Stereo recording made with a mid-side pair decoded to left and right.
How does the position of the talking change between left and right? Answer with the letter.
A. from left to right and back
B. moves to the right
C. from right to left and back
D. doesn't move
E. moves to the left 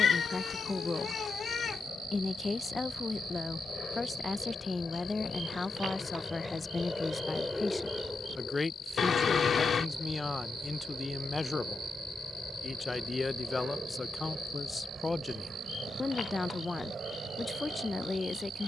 D.